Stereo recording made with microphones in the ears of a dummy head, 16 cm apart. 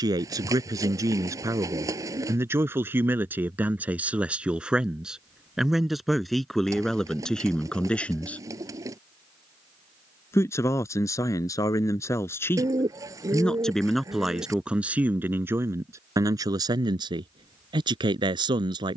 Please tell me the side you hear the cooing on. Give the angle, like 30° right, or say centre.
20° right.